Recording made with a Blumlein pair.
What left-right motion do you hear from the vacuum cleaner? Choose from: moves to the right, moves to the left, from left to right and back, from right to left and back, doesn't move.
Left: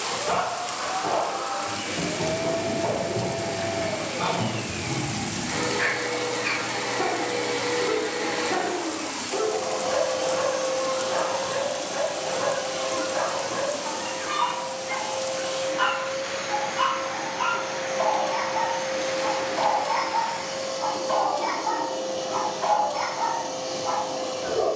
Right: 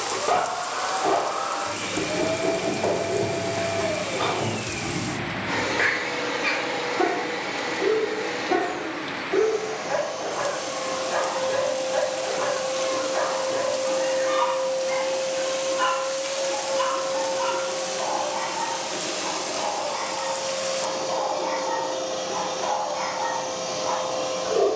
from right to left and back.